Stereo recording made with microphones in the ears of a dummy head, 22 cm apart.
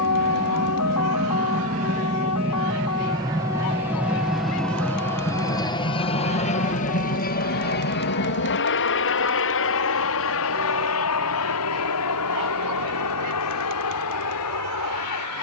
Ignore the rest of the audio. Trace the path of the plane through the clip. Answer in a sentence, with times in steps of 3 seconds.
You can hear the plane on the right from 0 s, in the centre from 3 s and on the left from 6 s.